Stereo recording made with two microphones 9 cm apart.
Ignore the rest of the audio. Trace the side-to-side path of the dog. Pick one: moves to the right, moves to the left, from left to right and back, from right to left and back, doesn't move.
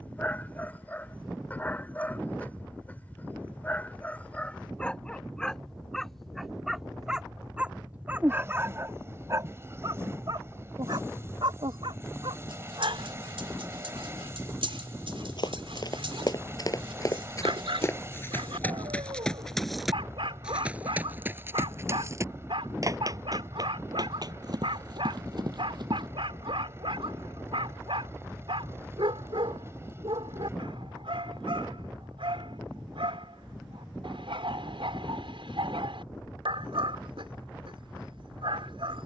moves to the right.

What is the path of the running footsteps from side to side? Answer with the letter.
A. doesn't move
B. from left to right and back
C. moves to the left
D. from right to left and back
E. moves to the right
E.